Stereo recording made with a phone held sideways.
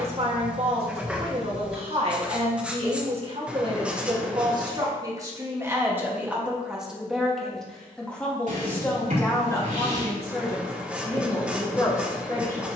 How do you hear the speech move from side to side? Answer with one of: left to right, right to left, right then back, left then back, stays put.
right to left.